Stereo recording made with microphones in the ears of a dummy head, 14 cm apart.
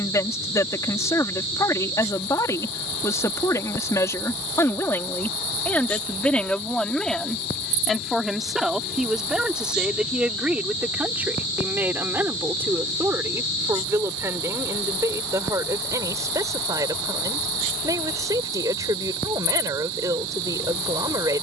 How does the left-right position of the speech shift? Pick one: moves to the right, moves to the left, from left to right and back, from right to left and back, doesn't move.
moves to the right.